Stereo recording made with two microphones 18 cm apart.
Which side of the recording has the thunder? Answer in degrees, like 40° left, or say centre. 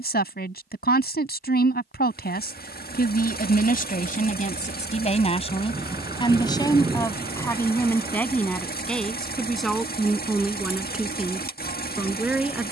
20° right.